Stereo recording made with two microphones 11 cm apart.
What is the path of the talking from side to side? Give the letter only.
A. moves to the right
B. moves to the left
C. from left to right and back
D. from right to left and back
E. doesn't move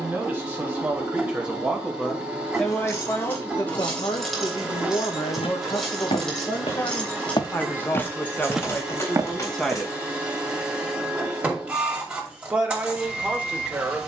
D.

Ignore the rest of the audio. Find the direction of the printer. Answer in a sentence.
In this clip you hear the printer in the centre.